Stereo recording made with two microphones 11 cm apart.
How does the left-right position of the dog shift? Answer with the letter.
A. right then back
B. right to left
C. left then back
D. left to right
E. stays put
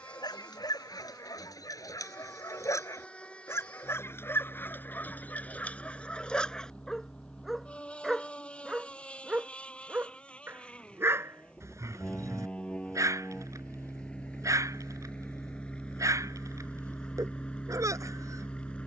D.